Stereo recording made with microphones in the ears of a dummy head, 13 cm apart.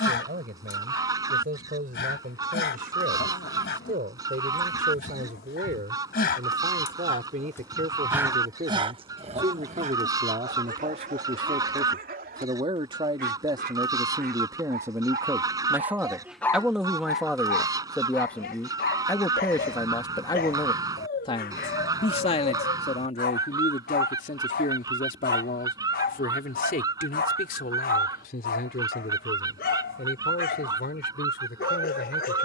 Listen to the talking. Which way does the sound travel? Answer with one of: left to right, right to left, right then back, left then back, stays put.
right to left.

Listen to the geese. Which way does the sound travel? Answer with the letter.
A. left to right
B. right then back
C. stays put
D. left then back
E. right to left
C.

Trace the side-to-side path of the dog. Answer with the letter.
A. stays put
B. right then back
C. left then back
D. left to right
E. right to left
B.